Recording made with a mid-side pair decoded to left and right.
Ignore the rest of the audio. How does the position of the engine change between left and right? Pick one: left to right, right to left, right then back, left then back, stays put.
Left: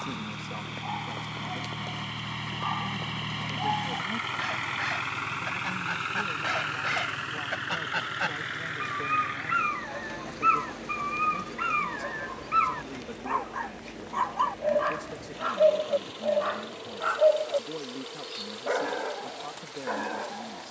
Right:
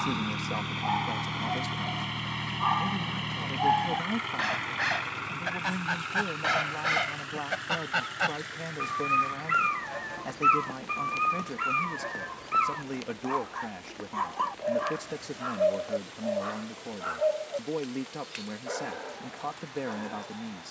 right to left.